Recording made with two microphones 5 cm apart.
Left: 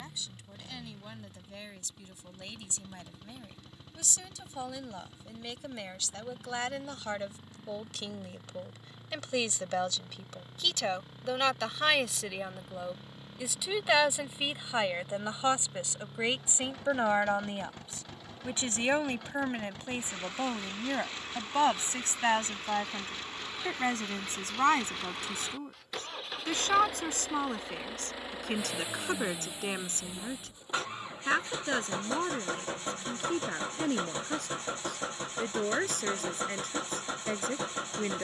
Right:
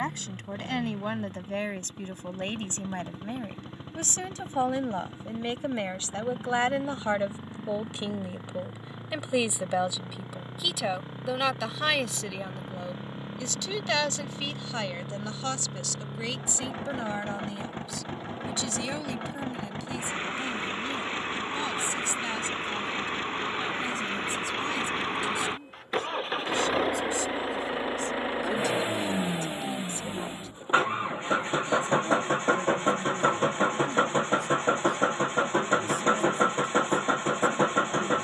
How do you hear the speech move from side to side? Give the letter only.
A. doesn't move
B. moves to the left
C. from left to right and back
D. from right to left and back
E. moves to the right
B.